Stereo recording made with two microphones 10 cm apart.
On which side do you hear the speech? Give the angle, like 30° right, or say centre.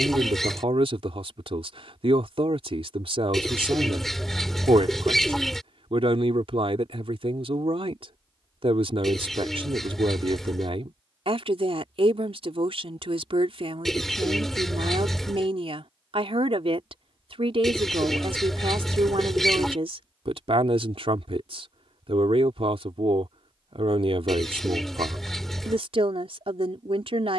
70° right.